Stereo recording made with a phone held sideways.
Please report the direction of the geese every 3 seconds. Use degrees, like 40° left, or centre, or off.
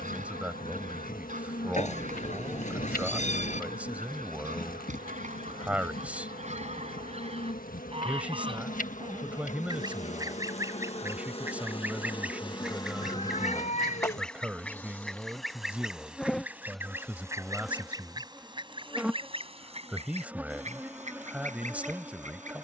60° right, 60° right, 40° right, 20° right, centre, 10° right, 40° right, 60° right.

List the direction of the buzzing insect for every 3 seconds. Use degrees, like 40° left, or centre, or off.
70° left, 70° left, 70° left, 50° left, 20° left, centre, 10° right, 10° right.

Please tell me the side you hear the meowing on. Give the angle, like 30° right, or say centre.
50° left.